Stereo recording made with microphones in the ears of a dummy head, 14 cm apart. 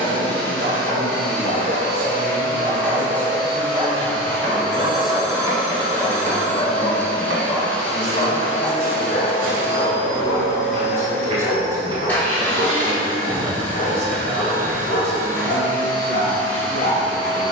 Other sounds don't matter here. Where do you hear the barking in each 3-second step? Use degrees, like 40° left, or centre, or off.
50° right, 30° right, 20° left, 60° left, 70° left, 70° left.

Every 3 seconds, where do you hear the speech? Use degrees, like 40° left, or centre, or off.
centre, 10° left, 20° right, 20° right, 20° right, 20° right.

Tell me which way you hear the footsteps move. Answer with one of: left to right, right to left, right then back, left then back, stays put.
right then back.